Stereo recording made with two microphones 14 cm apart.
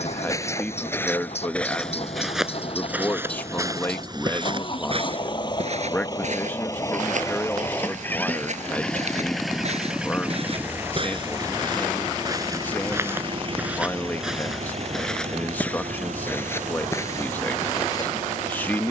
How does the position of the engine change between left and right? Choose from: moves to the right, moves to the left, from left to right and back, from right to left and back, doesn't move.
moves to the right.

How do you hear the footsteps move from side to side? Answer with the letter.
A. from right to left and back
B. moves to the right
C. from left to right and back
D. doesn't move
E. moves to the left
C.